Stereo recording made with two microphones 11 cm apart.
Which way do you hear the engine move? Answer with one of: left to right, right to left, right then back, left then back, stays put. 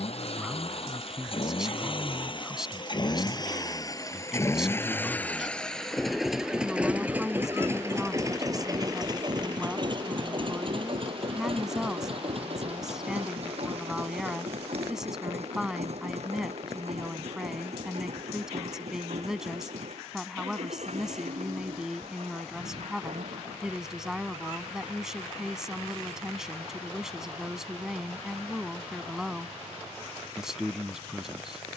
left to right.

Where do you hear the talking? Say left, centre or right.
centre.